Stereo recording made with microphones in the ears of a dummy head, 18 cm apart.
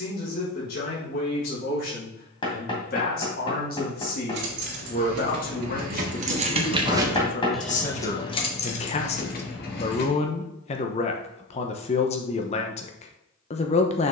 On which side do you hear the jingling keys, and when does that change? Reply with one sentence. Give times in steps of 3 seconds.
In this clip you hear the jingling keys not at all from 0 s, on the right from 3 s, in the centre from 6 s, on the left from 9 s and not at all from 12 s.